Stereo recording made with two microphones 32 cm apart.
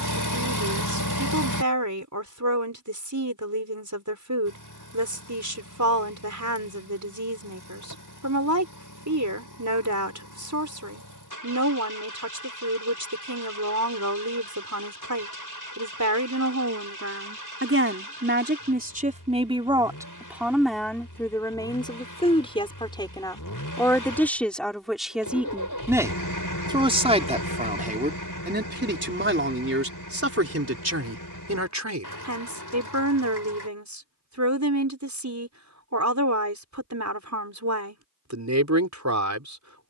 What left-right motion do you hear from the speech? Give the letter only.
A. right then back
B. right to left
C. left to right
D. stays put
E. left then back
E.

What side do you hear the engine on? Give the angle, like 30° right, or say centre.
70° left.